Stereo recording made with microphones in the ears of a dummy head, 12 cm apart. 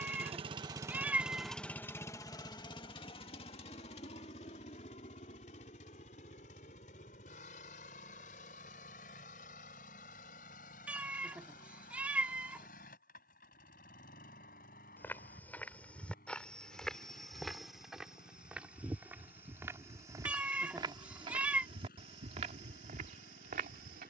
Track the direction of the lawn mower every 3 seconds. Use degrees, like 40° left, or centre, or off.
centre, 50° left, 60° left, 70° left, 70° left, 70° left, 70° left, 70° left.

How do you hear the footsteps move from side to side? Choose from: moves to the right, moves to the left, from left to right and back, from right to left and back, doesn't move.
moves to the right.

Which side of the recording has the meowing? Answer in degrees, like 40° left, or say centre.
10° right.